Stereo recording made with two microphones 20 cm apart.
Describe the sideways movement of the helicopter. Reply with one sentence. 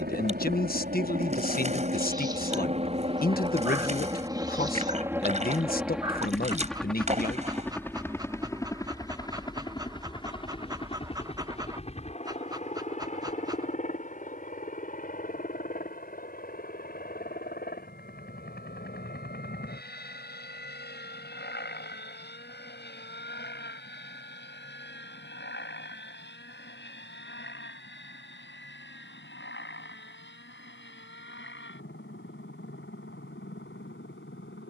You can hear the helicopter travel towards the left.